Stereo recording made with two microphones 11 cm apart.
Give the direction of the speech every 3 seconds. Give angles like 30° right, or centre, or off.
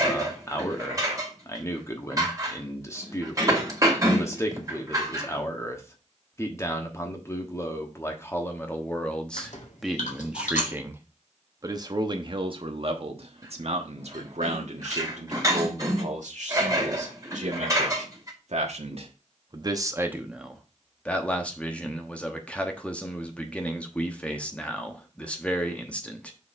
20° left, 20° left, 20° left, 10° right, 60° right, 80° right, 40° right, 10° left, 10° left.